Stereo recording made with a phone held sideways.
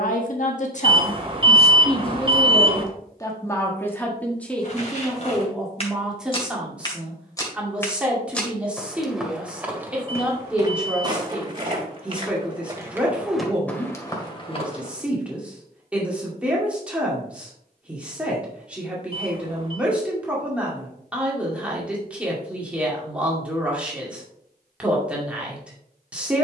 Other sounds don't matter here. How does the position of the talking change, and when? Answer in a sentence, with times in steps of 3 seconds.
In this clip you hear the talking on the left from 0 s and in the centre from 3 s.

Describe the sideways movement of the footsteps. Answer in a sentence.
You can hear the footsteps move from left to right and back again.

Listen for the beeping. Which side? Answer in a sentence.
In this clip you hear the beeping on the right.